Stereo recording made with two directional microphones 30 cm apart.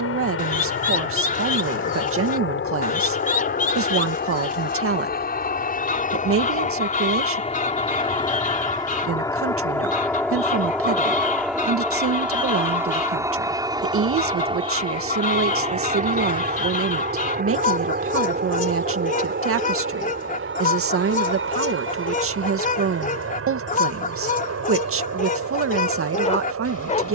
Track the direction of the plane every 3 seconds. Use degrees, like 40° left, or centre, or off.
40° left, 30° left, 20° left, centre, 10° right, 20° right, 30° right, 40° right, 50° right.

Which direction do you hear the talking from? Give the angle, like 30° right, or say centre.
50° right.